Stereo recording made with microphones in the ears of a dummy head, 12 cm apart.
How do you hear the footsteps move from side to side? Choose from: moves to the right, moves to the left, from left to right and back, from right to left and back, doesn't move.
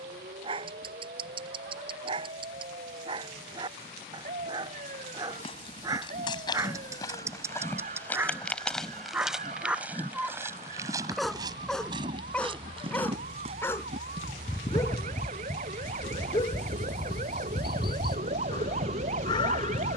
moves to the right.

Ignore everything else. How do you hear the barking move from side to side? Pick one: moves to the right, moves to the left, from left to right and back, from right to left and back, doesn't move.
moves to the left.